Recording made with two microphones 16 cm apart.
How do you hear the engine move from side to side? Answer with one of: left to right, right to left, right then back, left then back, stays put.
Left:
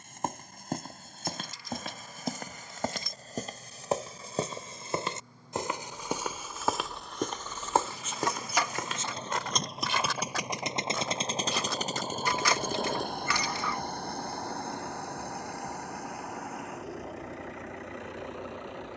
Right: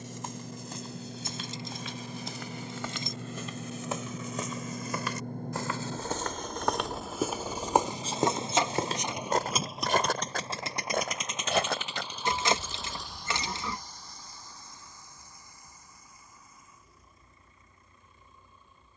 right to left.